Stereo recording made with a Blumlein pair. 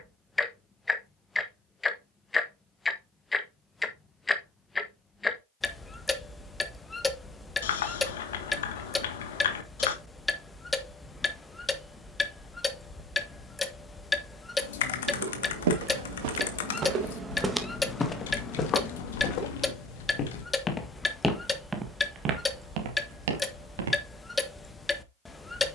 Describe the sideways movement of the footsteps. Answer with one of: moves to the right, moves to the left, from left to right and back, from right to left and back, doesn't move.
from right to left and back.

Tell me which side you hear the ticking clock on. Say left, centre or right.
centre.